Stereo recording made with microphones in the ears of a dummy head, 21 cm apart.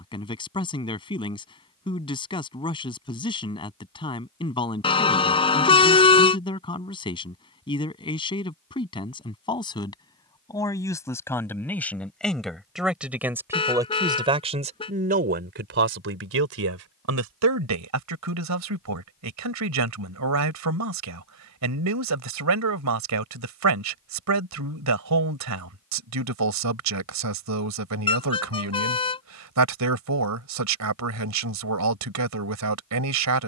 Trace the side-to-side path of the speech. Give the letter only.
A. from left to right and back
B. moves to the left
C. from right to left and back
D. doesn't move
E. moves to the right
E.